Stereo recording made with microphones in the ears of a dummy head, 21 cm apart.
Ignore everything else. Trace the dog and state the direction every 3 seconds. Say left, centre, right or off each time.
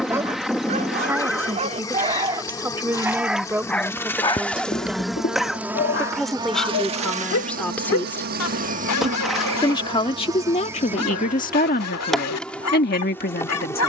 right, left, left, left, left.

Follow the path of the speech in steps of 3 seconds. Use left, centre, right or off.
centre, centre, centre, left, left.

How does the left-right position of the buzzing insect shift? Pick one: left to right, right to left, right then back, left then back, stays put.
right then back.